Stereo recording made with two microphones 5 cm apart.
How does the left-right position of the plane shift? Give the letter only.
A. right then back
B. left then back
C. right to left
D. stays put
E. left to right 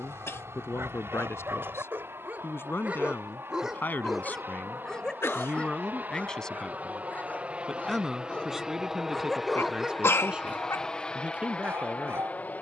C.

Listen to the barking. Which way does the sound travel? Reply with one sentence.
In this clip you hear the barking go left and come back.